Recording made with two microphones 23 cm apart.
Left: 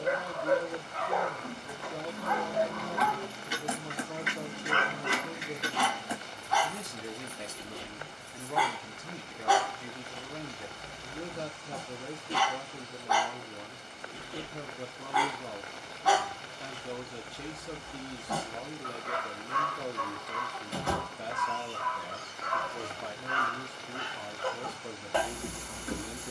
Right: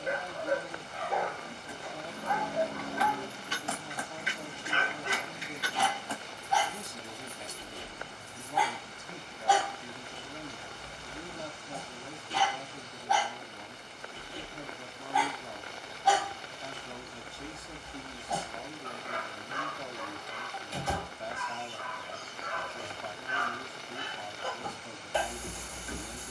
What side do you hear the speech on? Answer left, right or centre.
left.